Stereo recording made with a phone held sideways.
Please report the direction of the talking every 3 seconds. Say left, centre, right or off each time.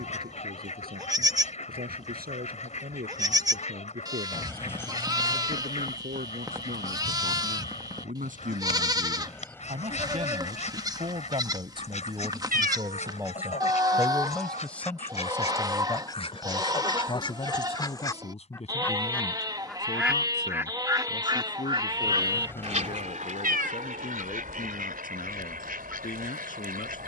right, right, right, right, centre, left, left, left, left.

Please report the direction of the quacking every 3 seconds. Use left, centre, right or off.
left, left, left, left, left, left, centre, right, right.